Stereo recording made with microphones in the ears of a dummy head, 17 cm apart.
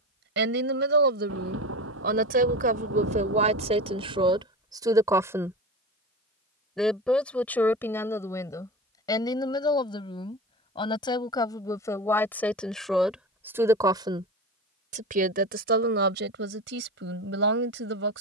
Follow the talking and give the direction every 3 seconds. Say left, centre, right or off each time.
right, right, centre, left, centre, right.